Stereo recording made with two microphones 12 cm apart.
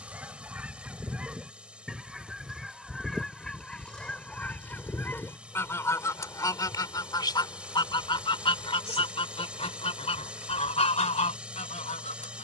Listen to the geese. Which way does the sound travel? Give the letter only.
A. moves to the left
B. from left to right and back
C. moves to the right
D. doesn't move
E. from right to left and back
A.